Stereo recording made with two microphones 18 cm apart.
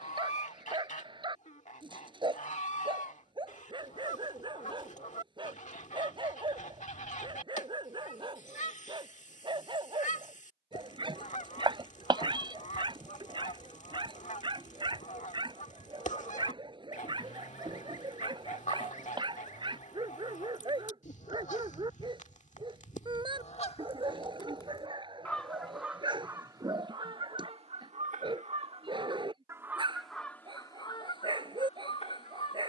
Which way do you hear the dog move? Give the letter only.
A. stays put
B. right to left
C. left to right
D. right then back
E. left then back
A.